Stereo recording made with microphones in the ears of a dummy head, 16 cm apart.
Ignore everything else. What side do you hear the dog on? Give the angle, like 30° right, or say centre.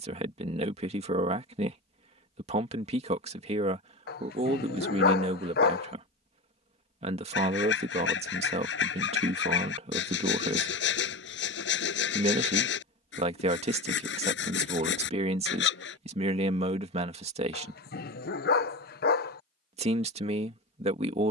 60° left.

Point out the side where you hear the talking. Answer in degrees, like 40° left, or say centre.
40° right.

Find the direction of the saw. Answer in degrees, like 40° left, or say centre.
70° left.